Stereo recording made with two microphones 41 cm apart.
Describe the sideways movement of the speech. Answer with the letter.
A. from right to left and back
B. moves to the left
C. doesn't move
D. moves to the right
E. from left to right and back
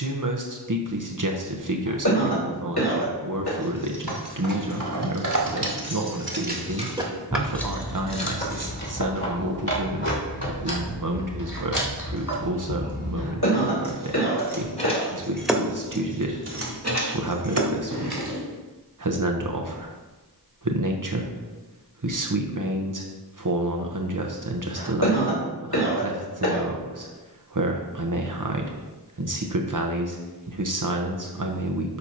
C.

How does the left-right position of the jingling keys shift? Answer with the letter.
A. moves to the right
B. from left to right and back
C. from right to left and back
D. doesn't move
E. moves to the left
C.